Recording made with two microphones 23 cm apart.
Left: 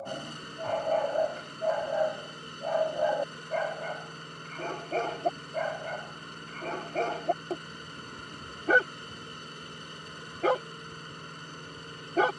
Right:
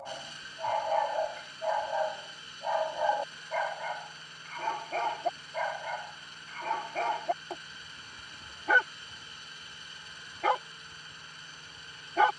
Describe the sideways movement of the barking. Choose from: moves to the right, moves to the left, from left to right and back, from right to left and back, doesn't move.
doesn't move.